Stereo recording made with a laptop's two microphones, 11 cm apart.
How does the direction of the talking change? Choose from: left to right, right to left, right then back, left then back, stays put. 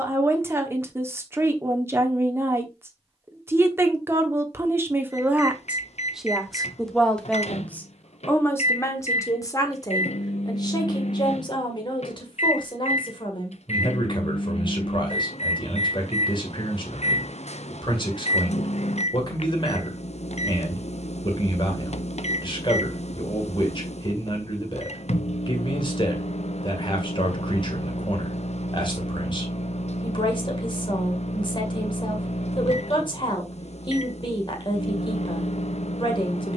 right to left.